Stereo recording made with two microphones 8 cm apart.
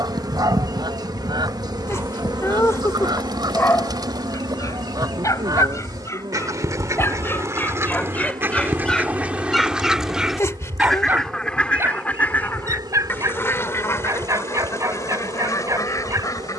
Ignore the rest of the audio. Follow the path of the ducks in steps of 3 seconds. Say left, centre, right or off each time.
right, right, right, centre, left, left.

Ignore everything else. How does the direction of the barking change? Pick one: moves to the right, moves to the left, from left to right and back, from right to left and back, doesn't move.
from right to left and back.